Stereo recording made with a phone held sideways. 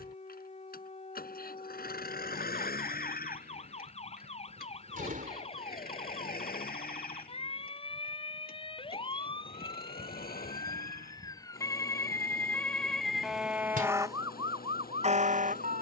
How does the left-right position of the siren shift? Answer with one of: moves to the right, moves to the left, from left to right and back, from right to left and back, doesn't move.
moves to the right.